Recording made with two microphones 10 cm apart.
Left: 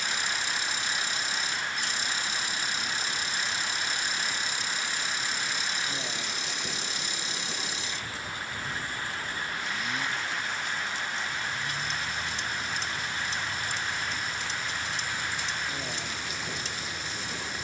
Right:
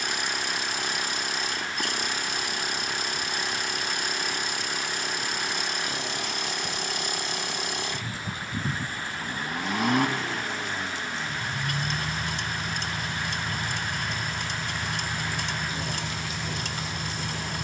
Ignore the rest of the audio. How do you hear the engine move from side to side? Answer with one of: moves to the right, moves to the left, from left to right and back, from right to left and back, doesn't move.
doesn't move.